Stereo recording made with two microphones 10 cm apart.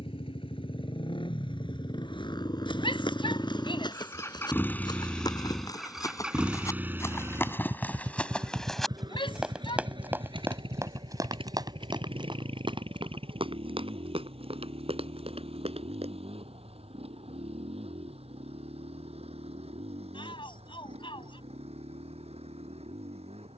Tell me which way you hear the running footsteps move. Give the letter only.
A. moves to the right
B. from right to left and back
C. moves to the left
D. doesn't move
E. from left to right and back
A.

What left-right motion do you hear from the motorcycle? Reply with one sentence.
In this clip you hear the motorcycle travel towards the right.